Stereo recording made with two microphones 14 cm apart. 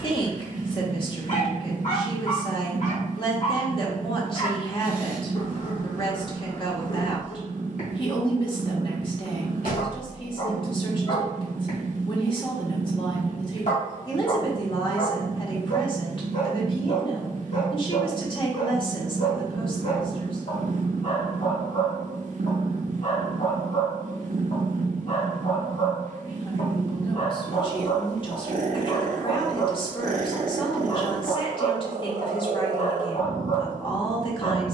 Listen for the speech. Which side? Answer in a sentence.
In this clip you hear the speech on the left.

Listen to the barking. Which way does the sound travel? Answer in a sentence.
You can hear the barking stay put.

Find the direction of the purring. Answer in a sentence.
In this clip you hear the purring on the right.